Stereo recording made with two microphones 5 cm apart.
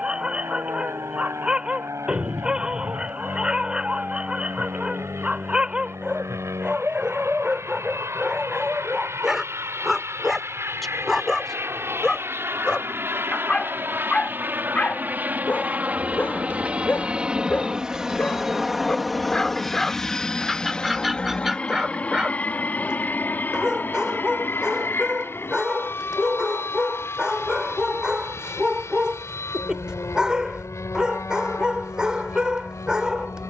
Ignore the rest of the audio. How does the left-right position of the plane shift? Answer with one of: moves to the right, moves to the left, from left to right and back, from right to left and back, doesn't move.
moves to the left.